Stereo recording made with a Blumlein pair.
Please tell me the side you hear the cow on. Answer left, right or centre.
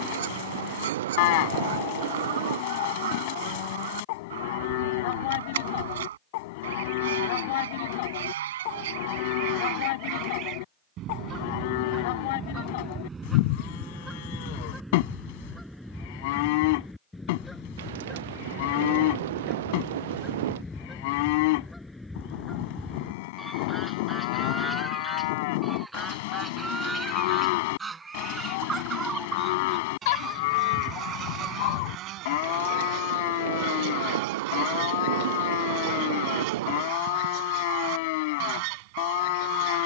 left.